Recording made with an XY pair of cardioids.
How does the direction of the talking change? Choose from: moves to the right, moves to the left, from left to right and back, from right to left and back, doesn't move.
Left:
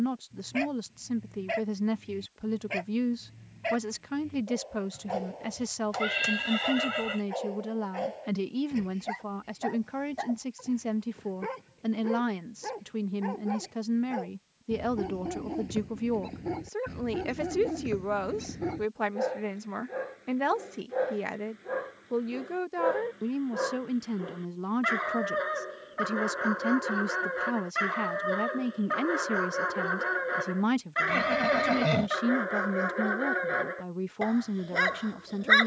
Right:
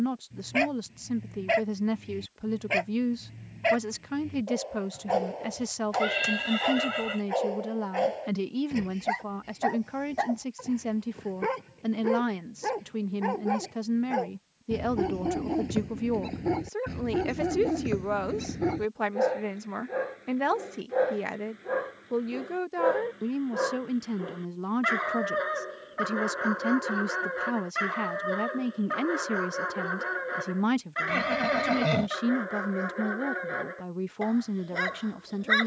doesn't move.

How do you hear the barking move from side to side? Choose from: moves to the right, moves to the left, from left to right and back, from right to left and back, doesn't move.
moves to the left.